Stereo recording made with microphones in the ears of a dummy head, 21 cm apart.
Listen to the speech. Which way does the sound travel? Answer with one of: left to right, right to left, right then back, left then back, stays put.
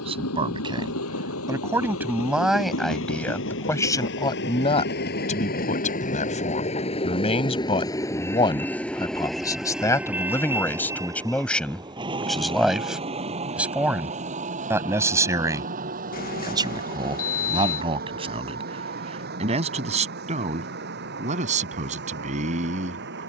left then back.